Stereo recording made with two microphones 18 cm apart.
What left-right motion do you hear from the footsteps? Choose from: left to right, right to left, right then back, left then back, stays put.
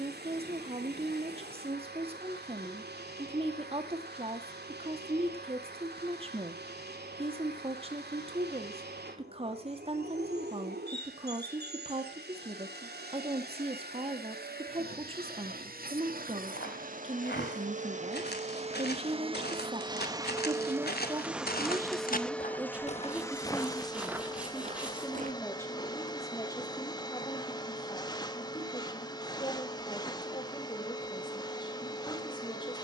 left to right.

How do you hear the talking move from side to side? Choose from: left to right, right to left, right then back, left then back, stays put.
right to left.